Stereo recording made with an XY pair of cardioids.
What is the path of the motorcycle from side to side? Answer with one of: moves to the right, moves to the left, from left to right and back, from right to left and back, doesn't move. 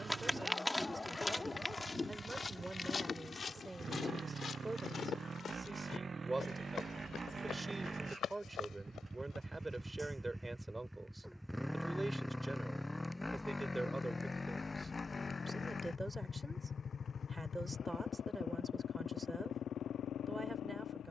moves to the left.